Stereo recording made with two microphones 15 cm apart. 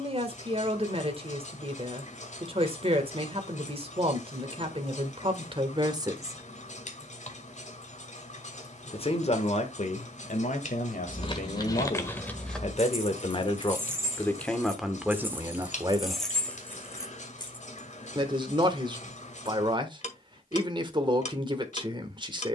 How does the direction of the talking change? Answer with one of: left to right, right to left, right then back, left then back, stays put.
left then back.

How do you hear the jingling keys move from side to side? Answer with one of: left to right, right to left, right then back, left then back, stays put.
right then back.